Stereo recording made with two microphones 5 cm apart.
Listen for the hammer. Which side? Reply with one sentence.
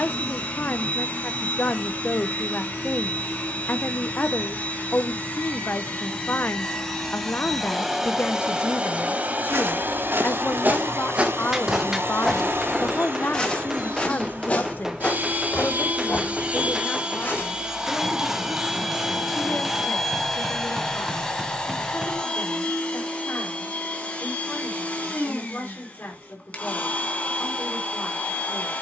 You can hear the hammer in the centre.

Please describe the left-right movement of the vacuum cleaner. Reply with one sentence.
You can hear the vacuum cleaner move from left to right and back again.